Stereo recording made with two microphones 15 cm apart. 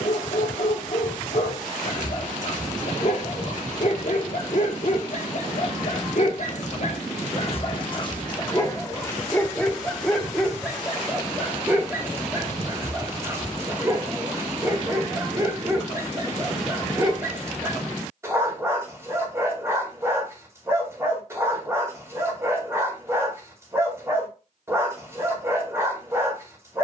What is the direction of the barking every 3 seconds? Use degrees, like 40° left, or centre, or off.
60° left, 60° left, 40° left, centre, 20° right, 20° right, 20° right, 20° right, 20° right.